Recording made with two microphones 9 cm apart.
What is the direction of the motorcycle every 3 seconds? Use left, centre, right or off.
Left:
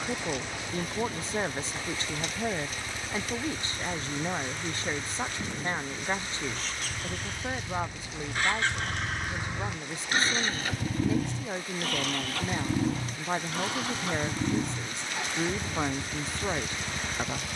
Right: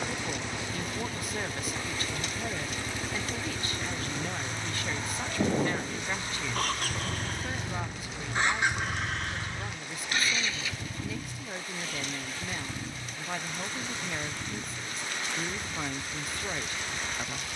right, right, right, left, left, left.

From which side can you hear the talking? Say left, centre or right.
left.